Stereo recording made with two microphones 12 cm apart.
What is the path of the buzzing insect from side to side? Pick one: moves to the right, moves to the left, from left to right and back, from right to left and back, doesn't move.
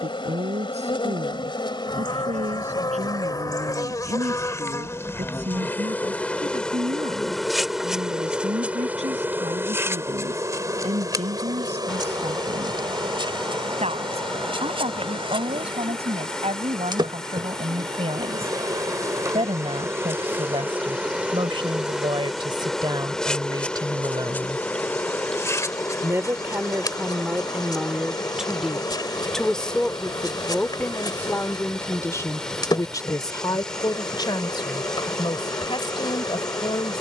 from left to right and back.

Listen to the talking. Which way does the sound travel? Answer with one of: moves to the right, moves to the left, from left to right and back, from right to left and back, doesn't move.
moves to the left.